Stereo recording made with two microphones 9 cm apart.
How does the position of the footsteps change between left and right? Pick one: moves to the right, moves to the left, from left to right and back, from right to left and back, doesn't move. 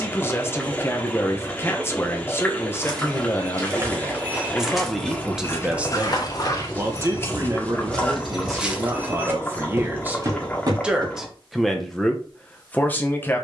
from right to left and back.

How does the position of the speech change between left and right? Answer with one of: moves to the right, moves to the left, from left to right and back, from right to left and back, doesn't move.
from left to right and back.